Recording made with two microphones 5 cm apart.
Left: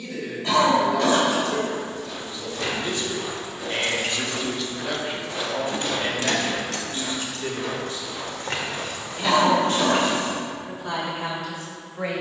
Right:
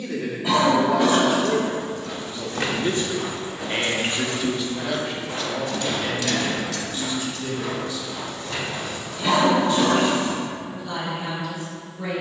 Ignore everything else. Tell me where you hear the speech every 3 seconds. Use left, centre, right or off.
right, centre, left, left.